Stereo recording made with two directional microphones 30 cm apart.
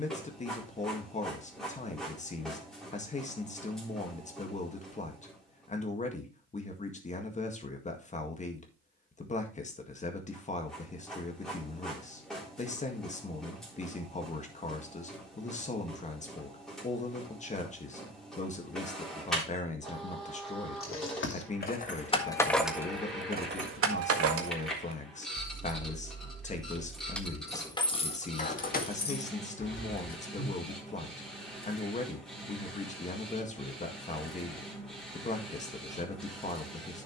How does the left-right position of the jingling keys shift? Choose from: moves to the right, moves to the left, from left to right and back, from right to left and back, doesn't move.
from left to right and back.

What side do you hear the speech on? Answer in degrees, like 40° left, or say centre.
20° left.